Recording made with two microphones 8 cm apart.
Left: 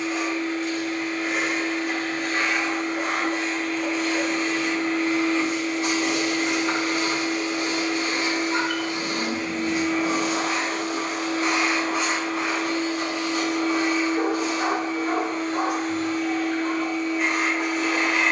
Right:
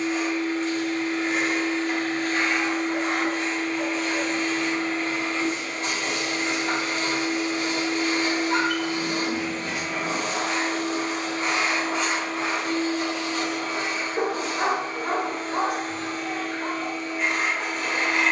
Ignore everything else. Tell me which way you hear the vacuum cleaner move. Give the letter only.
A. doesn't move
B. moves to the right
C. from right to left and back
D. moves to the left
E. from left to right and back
A.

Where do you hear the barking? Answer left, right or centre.
right.